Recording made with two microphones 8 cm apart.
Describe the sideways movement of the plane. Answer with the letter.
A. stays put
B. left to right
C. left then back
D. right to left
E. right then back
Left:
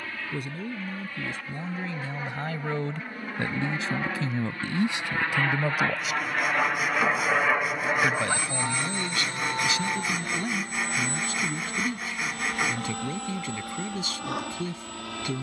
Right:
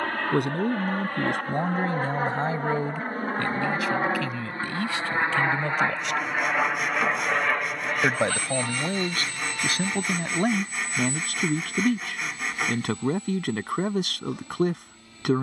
D.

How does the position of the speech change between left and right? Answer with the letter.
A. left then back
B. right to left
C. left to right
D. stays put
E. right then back
A.